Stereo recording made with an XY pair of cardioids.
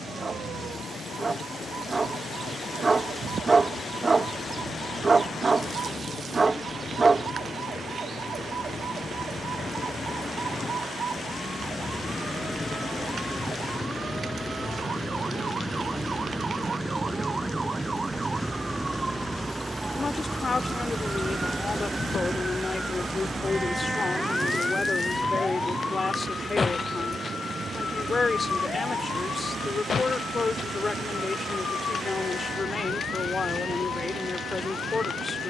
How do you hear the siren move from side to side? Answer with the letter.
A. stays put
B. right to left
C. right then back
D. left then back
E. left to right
B.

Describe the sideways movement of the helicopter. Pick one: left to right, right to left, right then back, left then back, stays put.
left to right.